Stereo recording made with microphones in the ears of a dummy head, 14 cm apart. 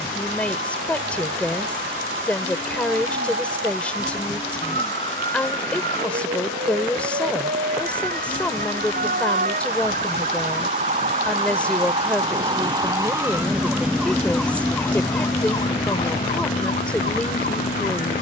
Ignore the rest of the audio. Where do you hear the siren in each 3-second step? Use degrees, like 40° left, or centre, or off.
70° right, 70° right, 60° right, 50° right, 10° right, 40° left.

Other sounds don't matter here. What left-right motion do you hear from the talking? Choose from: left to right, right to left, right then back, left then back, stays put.
stays put.